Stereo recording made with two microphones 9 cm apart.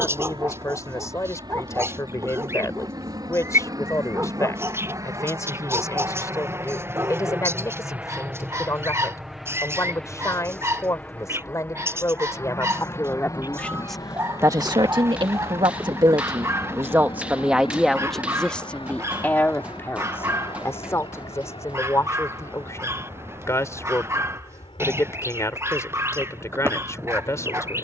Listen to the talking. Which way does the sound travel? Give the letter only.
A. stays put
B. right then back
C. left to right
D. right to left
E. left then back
B.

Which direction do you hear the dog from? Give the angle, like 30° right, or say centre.
30° right.